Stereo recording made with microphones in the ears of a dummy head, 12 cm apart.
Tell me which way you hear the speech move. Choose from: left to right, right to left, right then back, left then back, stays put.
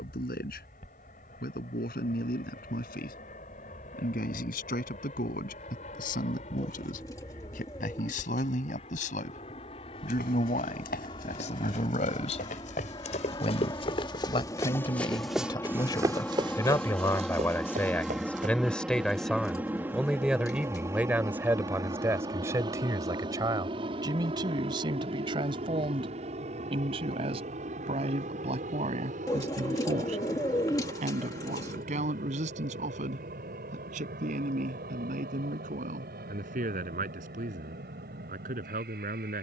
left to right.